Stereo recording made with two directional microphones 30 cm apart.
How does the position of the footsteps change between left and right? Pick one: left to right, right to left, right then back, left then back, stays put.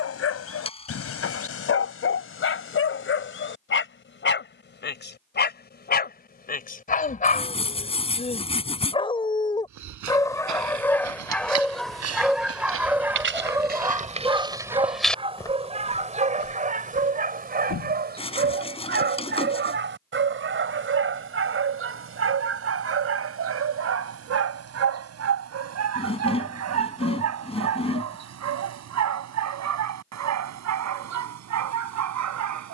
right to left.